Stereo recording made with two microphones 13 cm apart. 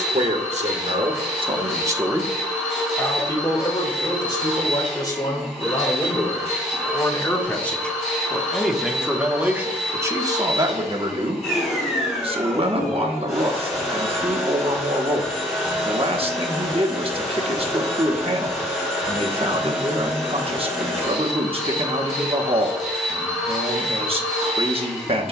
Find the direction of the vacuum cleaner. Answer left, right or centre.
centre.